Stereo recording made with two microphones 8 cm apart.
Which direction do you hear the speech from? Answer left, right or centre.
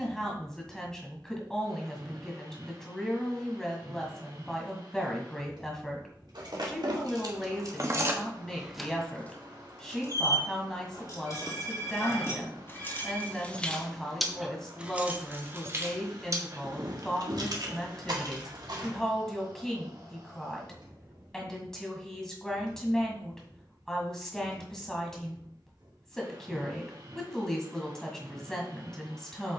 centre.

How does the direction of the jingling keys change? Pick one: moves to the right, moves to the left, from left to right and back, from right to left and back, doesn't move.
from right to left and back.